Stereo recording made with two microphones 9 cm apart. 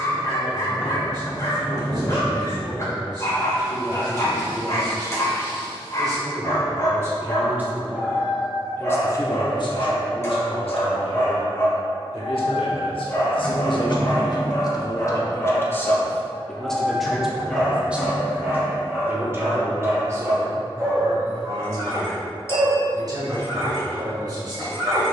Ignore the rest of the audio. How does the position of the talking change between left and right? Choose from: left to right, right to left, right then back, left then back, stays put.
left then back.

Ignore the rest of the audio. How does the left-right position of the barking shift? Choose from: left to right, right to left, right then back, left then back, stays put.
left to right.